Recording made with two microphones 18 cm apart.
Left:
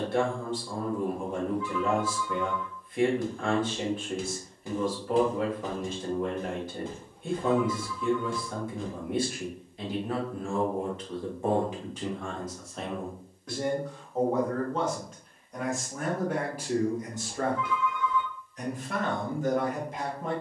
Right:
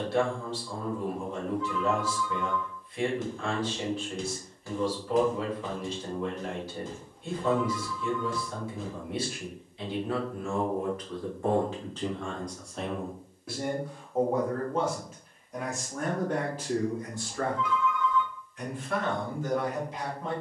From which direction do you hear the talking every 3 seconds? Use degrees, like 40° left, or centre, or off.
50° left, 50° left, 50° left, 30° left, centre, 10° left, 50° left.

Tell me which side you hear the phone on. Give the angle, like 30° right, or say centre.
60° left.